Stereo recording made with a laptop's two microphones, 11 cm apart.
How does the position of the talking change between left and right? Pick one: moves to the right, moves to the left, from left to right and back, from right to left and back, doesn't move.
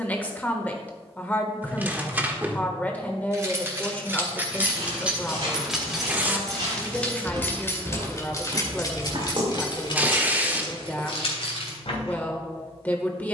doesn't move.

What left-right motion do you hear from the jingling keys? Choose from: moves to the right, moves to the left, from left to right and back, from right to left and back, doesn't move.
moves to the left.